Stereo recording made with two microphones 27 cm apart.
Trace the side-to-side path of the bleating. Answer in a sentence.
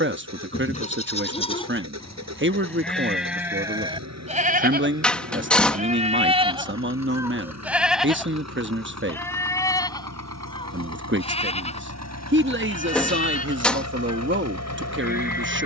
You can hear the bleating go right and come back.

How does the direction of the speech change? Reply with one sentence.
You can hear the speech stay put.